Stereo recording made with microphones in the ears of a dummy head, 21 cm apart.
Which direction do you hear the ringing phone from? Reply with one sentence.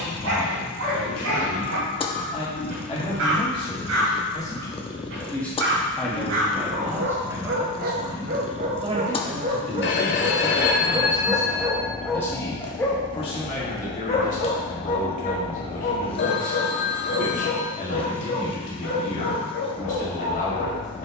In this clip you hear the ringing phone on the left.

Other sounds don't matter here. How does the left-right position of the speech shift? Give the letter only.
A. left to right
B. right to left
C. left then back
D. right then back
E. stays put
D.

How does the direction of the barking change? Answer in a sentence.
In this clip you hear the barking move from right to left.